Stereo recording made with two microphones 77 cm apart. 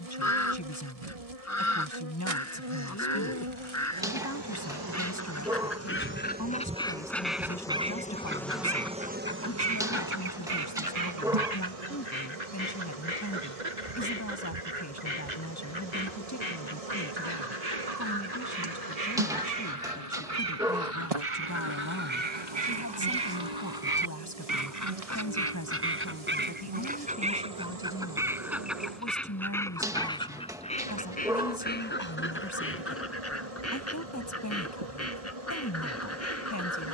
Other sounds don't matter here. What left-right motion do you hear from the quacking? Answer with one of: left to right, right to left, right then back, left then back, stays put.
right then back.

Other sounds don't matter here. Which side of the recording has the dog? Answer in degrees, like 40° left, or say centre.
centre.